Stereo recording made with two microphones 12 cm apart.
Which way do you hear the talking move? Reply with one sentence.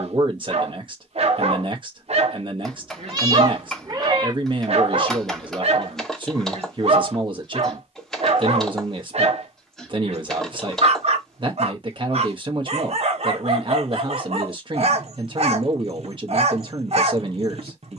In this clip you hear the talking stay put.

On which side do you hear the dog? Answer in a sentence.
You can hear the dog on the right.